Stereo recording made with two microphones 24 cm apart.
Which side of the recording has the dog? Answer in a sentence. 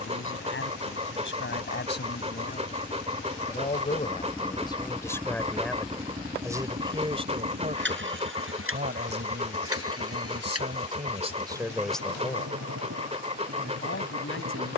In this clip you hear the dog on the right.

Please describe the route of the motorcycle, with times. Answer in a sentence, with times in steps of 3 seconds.
In this clip you hear the motorcycle on the left from 0 s, in the centre from 3 s and on the right from 6 s.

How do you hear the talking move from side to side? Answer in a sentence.
You can hear the talking go right and come back.